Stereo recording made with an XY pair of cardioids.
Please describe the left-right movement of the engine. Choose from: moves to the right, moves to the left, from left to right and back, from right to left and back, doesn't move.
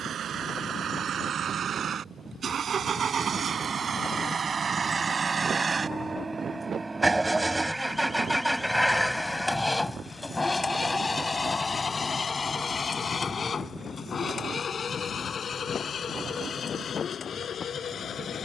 moves to the left.